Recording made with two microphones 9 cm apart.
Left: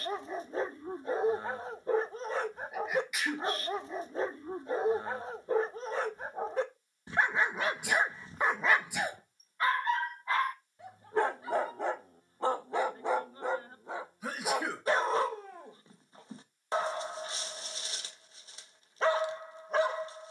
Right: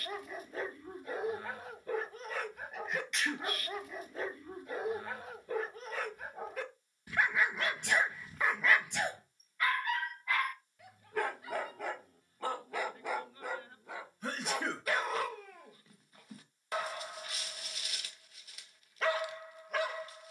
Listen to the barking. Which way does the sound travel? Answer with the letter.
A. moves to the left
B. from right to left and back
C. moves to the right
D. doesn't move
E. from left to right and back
D.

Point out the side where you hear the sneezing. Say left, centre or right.
centre.